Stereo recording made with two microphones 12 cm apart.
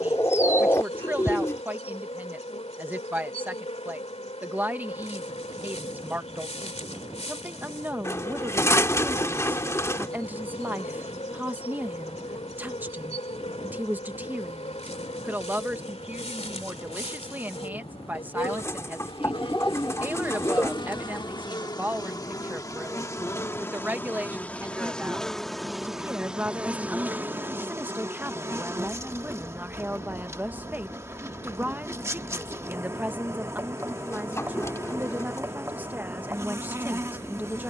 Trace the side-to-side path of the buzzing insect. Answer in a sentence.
You can hear the buzzing insect move from left to right.